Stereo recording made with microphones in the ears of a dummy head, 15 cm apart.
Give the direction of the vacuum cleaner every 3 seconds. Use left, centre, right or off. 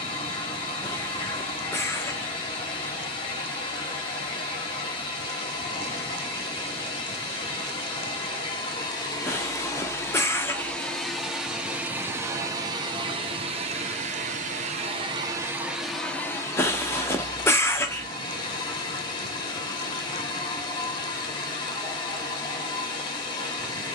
left, left, left, centre, right, centre, left, left.